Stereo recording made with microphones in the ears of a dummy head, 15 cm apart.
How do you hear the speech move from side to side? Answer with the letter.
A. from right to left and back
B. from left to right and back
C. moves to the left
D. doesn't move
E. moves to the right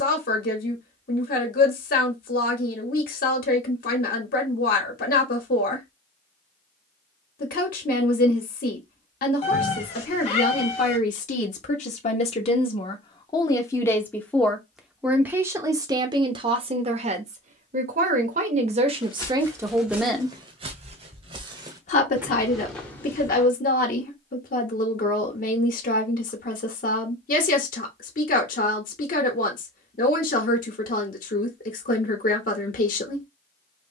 B.